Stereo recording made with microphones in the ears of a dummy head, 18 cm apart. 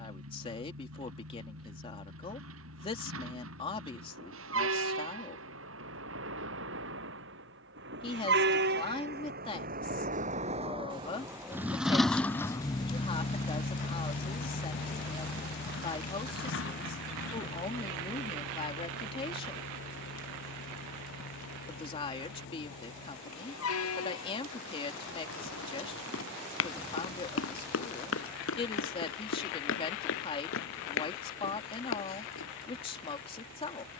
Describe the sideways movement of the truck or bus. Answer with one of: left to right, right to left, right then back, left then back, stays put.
right to left.